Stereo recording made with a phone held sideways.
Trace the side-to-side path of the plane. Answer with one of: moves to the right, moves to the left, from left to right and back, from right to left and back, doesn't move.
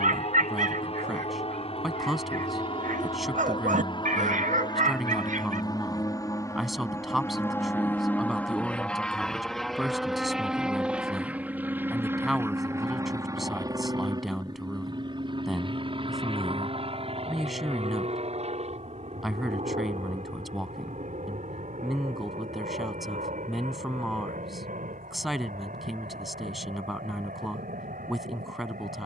moves to the right.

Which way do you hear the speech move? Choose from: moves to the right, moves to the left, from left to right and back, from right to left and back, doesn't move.
doesn't move.